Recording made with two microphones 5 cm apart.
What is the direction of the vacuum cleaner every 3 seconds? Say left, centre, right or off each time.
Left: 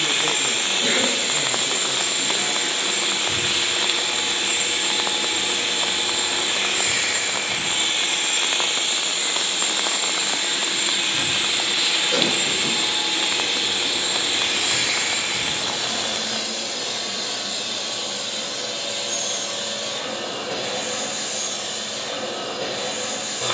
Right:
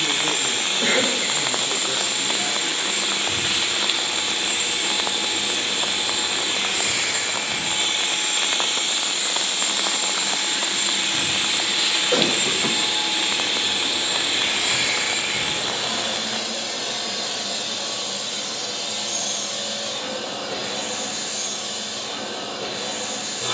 left, left, left, left, centre, centre, left, left.